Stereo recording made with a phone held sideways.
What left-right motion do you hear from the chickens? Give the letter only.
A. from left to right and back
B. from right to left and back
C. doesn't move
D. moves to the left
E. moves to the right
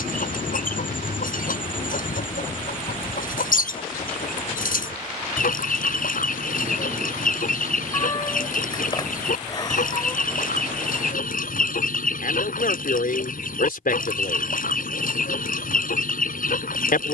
C.